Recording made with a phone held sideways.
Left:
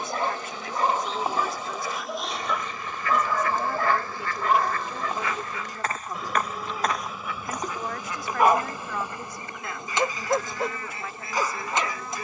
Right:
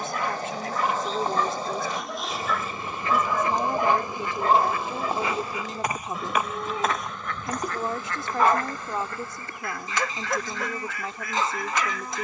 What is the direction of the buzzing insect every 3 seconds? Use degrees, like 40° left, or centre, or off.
10° left, 20° right, 10° right, 20° left.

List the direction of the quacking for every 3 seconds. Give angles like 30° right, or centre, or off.
40° right, 10° right, 10° left, 30° left.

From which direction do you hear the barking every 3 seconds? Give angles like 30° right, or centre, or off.
20° left, 20° right, centre, 30° left.